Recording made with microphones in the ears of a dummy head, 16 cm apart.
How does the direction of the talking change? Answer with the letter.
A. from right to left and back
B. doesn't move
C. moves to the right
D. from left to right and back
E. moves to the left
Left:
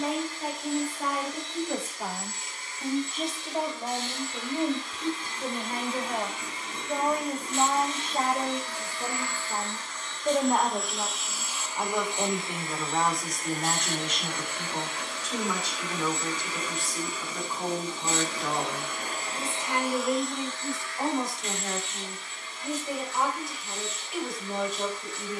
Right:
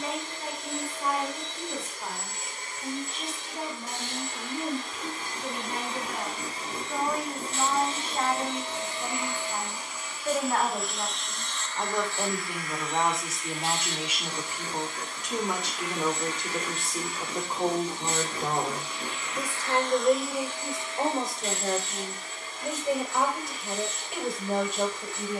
C.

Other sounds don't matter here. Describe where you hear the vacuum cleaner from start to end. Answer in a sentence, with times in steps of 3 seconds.
You can hear the vacuum cleaner on the right from 0 s, in the centre from 9 s, on the left from 12 s and on the right from 21 s.